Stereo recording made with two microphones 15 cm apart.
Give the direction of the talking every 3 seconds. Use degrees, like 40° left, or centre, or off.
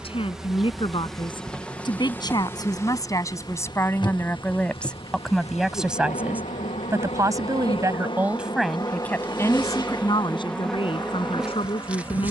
30° left, 10° left, 10° right, 30° left.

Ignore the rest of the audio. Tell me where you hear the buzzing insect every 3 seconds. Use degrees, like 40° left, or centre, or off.
10° left, 40° left, 40° left, 10° left.